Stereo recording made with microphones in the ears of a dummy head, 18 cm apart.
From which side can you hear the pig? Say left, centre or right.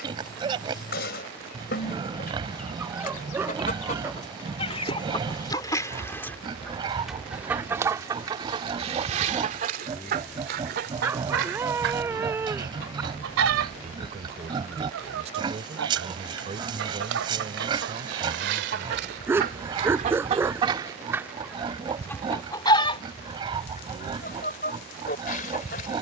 right.